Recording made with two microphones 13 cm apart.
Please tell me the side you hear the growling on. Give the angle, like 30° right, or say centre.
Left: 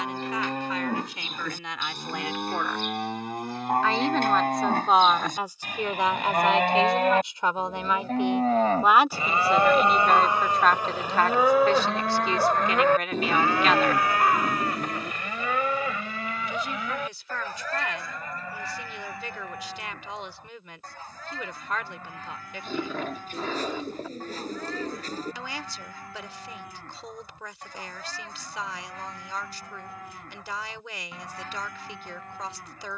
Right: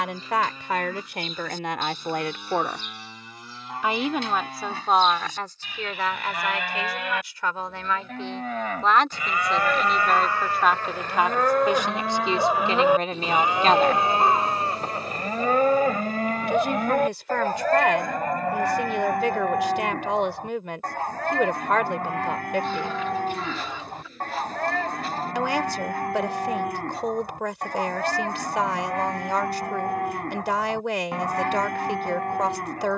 50° left.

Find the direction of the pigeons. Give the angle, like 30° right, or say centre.
40° left.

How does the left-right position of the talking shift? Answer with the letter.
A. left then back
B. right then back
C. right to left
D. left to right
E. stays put
A.